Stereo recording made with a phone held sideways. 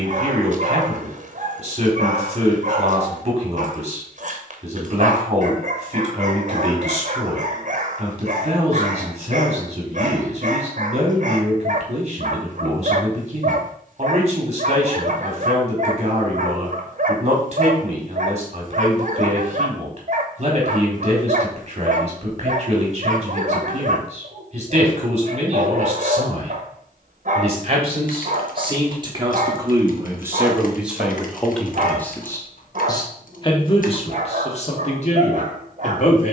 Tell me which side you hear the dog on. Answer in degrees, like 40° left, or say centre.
50° right.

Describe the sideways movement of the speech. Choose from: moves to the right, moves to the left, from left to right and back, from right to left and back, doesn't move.
moves to the left.